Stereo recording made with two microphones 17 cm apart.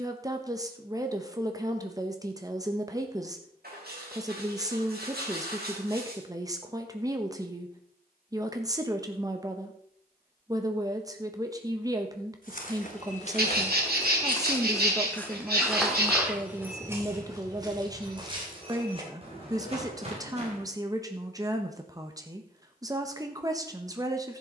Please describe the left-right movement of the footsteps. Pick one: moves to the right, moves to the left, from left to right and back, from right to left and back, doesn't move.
moves to the right.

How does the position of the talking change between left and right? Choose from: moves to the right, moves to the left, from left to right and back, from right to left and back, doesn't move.
doesn't move.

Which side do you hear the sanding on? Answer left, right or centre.
right.